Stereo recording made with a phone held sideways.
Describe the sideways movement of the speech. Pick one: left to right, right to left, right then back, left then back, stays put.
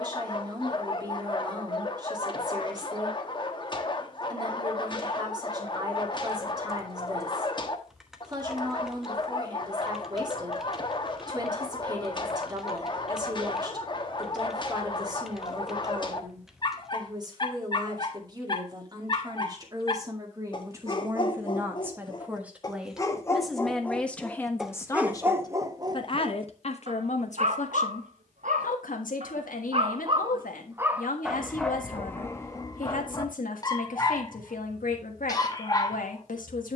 right to left.